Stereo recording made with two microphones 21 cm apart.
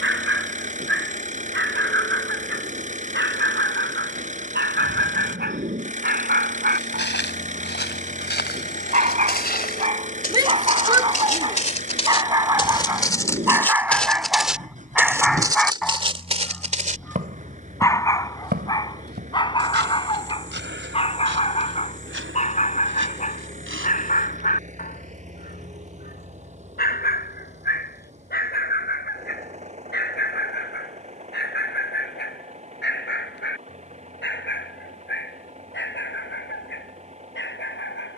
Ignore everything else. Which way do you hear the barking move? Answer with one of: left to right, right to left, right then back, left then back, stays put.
right to left.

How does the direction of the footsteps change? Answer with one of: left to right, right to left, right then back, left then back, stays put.
left to right.